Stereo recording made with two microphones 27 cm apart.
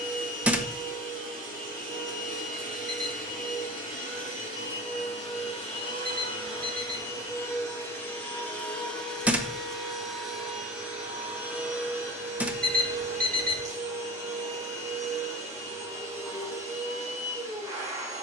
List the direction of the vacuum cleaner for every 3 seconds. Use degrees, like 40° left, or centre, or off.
30° left, 30° left, 10° left, centre, 10° right, 10° right.